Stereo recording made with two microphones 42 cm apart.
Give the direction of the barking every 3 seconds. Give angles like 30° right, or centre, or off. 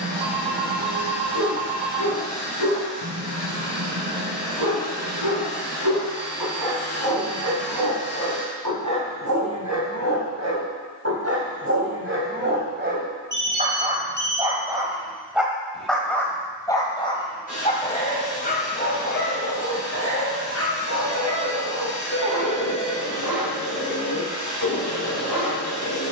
70° right, 60° right, 50° right, 40° right, 20° right, 10° left, 30° left, 40° left, 50° left.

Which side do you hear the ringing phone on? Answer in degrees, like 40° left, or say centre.
80° right.